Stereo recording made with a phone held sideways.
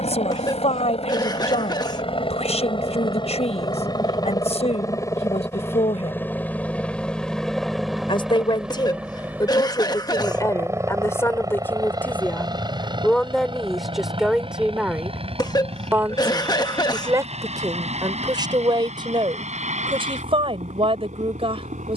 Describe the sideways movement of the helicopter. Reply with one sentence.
You can hear the helicopter go from the left side to the right.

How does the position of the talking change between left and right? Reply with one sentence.
You can hear the talking go from the left side to the right.